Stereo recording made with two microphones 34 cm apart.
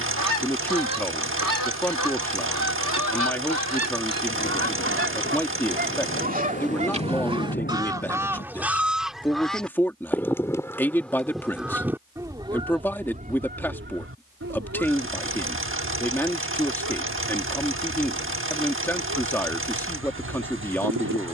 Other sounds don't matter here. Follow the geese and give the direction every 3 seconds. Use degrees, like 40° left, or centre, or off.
60° right, 40° right, 10° right, centre, 30° right, 60° right, 70° right.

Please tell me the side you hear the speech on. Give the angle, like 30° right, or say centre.
10° left.